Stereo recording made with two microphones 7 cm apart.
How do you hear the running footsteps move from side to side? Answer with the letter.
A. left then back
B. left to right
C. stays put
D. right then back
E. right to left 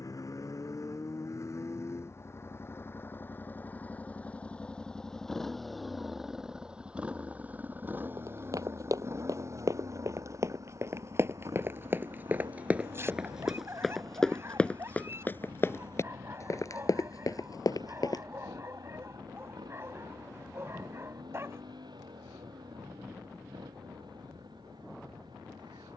E.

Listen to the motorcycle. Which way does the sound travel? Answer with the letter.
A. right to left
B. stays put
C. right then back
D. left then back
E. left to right
E.